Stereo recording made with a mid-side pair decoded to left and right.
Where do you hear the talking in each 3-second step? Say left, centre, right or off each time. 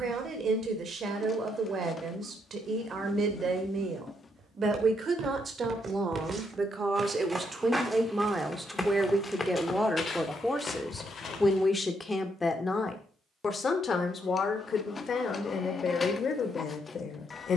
right, right, right, centre, left, left.